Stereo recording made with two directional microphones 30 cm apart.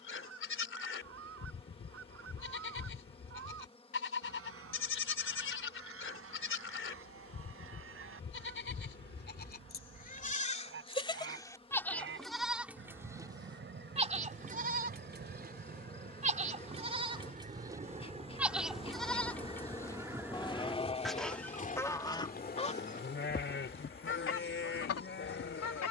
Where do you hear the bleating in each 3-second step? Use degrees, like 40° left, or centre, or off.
40° left, 40° left, 40° left, 20° left, 10° right, 20° right, 10° left, 30° left, 40° left.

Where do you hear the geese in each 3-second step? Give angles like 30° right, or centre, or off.
50° right, 50° right, 50° right, 40° right, 40° right, 30° right, 10° right, 20° left, 50° left.